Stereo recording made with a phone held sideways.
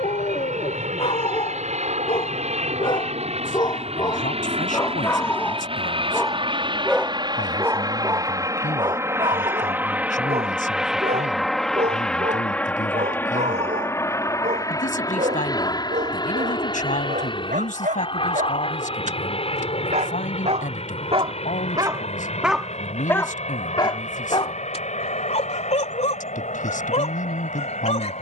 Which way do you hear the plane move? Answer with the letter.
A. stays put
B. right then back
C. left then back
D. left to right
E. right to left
E.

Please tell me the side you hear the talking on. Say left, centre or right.
left.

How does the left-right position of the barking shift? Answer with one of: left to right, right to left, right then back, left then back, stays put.
right then back.